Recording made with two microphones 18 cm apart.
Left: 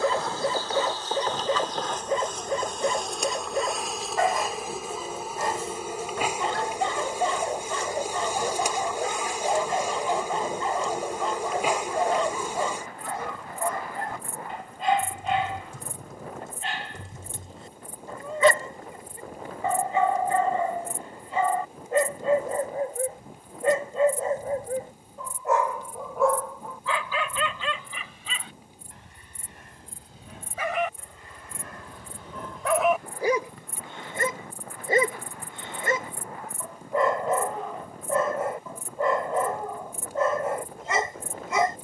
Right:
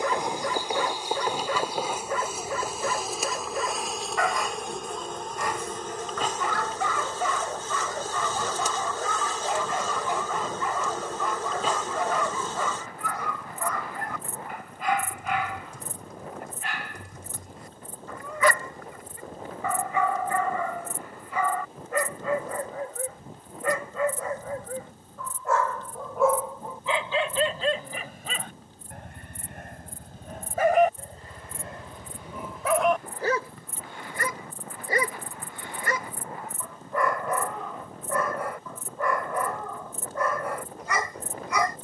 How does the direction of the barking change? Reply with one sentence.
In this clip you hear the barking go right and come back.